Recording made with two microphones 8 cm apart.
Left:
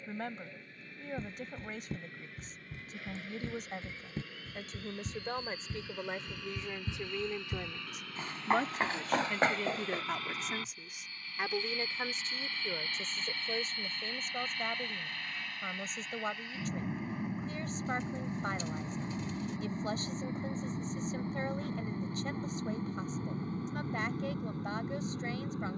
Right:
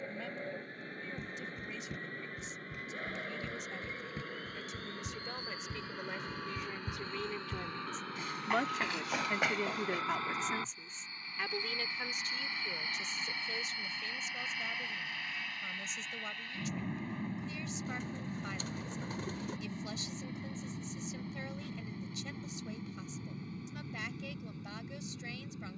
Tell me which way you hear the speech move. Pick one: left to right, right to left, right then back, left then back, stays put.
right then back.